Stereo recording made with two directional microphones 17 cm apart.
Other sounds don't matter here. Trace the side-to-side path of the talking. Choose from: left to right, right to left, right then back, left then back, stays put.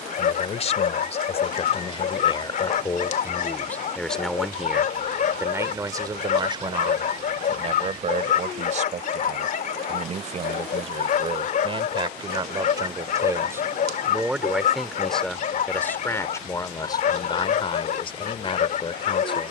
right then back.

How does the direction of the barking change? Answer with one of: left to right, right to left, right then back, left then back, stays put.
stays put.